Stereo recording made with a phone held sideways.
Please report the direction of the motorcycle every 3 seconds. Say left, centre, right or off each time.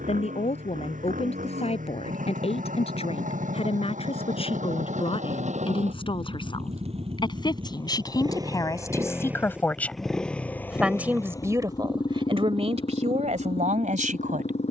right, right, right, centre, left.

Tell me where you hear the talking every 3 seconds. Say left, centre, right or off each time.
left, left, left, centre, right.